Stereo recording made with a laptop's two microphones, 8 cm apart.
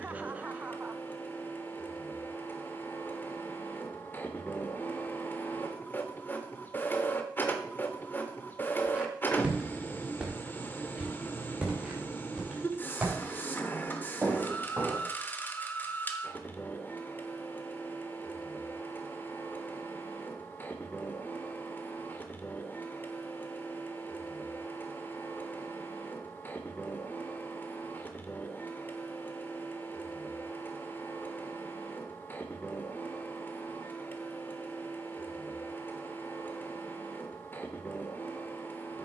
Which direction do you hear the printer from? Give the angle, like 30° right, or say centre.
30° left.